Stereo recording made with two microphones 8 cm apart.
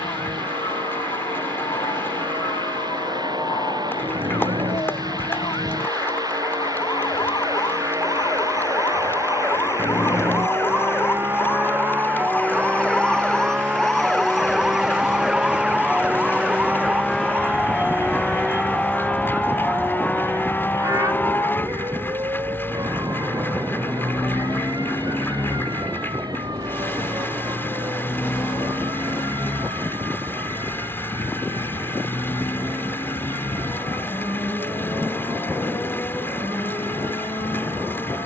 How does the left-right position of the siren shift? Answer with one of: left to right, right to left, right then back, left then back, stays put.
left to right.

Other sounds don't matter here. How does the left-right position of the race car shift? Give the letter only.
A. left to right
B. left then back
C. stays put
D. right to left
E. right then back
D.